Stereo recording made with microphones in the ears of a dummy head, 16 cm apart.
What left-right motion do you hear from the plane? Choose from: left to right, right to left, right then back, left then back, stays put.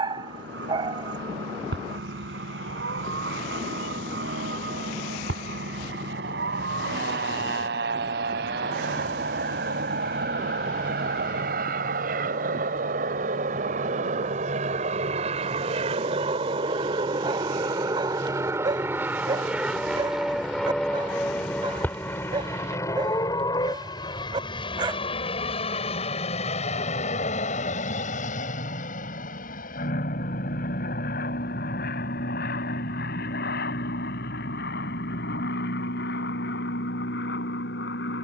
right to left.